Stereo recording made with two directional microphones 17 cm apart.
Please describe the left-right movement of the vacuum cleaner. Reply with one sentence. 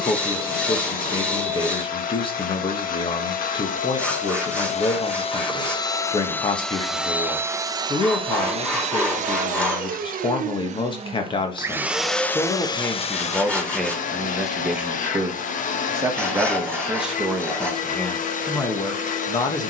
You can hear the vacuum cleaner go right and come back.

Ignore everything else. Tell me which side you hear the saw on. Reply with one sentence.
In this clip you hear the saw in the centre.